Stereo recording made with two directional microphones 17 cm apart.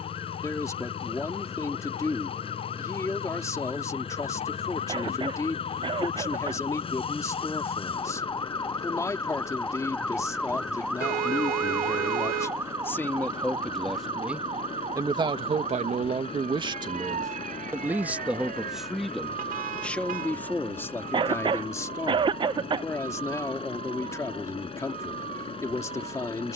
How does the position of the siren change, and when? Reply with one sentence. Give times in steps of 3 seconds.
In this clip you hear the siren on the left from 0 s, in the centre from 9 s and on the right from 12 s.